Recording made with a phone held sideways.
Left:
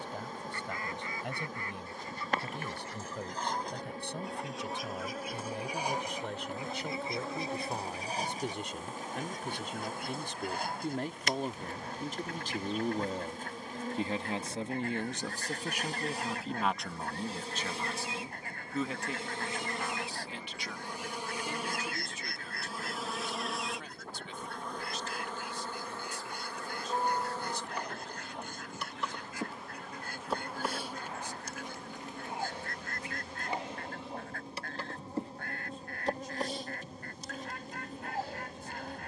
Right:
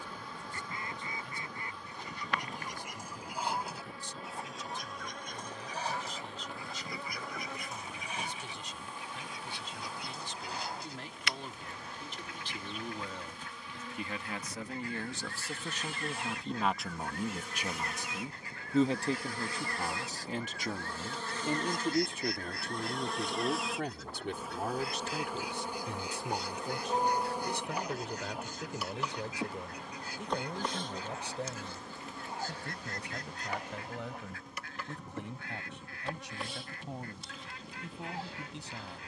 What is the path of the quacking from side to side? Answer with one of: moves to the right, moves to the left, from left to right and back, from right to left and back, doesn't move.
moves to the left.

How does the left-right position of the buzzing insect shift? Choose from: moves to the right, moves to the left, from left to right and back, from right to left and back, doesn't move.
from left to right and back.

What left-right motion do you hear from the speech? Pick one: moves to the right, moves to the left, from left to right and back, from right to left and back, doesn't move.
moves to the right.